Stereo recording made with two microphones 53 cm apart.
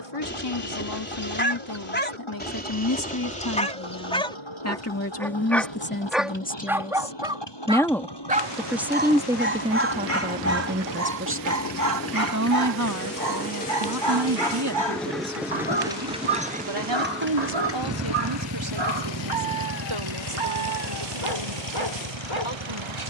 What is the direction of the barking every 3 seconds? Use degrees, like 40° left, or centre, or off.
20° left, 10° left, 10° right, 30° right, 50° right, 60° right, 60° right, 60° right.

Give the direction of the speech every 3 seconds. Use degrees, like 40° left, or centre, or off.
40° left, 30° left, 10° left, 20° right, 40° right, 50° right, 60° right, 70° right.